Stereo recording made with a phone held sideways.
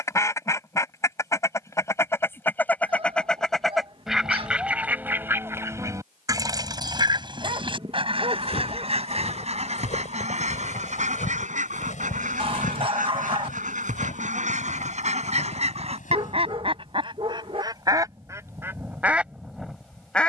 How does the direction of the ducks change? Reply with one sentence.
In this clip you hear the ducks move from left to right and back again.